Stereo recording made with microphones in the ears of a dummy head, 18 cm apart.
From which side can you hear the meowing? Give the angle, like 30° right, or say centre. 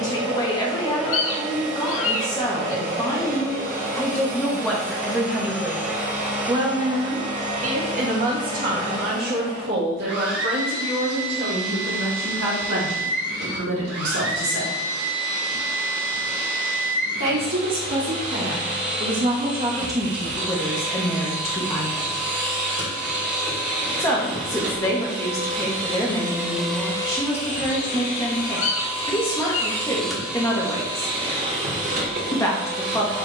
70° left.